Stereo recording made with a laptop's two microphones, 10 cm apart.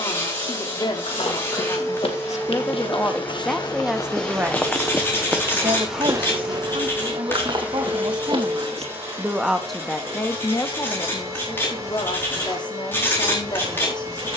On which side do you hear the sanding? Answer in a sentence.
You can hear the sanding on the left.